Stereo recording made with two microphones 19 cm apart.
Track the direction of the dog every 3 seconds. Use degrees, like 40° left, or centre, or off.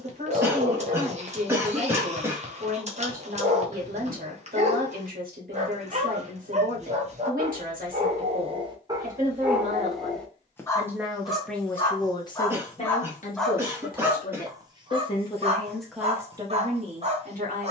40° right, 40° right, 30° right, 10° left, centre, 30° right.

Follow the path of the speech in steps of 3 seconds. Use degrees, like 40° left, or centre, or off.
50° right, 50° right, 50° right, 20° right, 40° left, 10° right.